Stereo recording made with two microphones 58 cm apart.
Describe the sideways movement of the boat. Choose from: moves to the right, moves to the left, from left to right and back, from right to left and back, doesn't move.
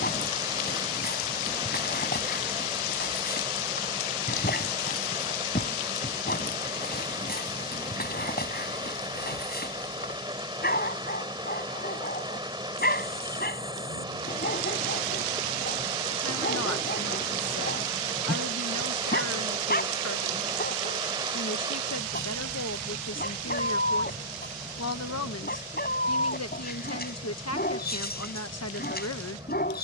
doesn't move.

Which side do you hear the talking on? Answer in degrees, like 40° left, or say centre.
30° left.